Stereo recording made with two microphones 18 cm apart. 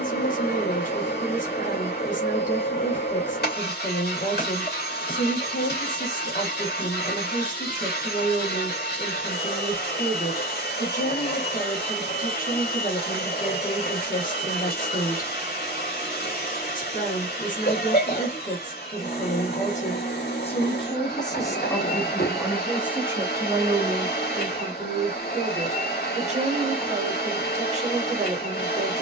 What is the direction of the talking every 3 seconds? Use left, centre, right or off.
left, left, left, left, left, left, left, centre, right, right.